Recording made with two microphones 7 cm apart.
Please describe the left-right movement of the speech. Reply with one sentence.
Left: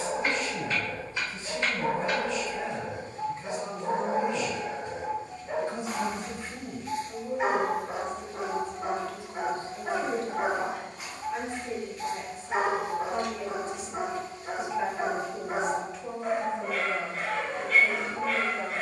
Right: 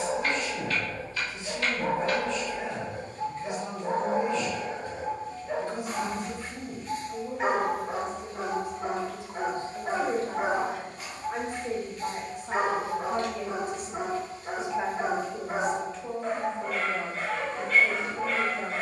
In this clip you hear the speech move from left to right and back again.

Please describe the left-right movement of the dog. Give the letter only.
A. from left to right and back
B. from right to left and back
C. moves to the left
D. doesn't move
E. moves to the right
D.